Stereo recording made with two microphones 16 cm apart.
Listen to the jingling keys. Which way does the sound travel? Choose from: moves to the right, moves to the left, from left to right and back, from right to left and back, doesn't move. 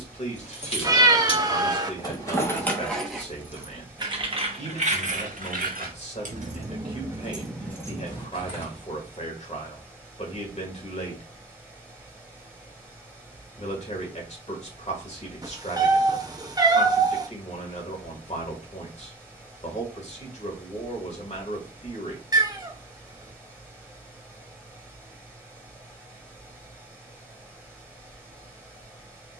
from left to right and back.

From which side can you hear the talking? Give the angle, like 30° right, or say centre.
50° left.